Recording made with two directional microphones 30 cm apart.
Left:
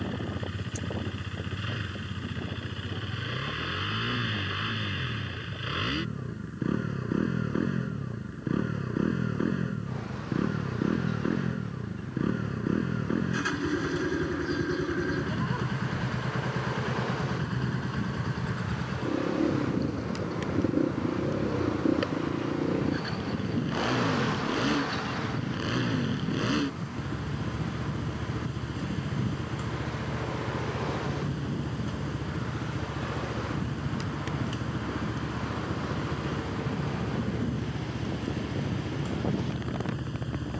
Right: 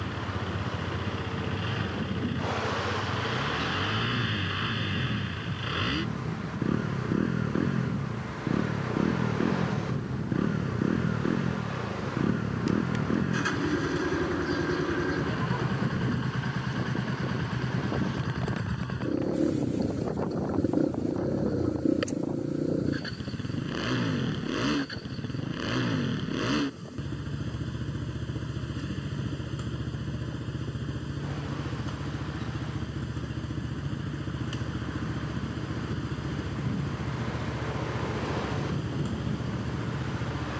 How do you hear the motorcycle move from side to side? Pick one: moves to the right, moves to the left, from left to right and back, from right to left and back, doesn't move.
doesn't move.